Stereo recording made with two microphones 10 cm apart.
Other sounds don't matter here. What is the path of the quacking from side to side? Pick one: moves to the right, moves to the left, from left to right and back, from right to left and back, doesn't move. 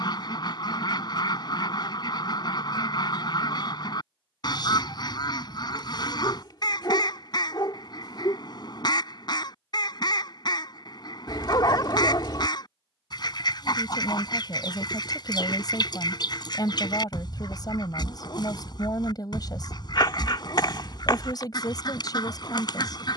doesn't move.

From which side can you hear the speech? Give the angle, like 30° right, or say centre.
40° left.